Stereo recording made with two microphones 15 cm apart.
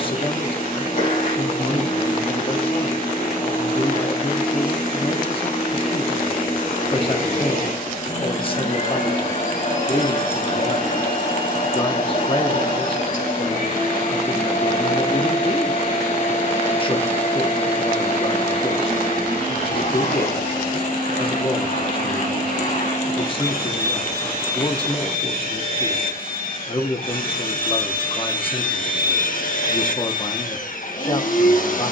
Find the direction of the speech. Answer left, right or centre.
left.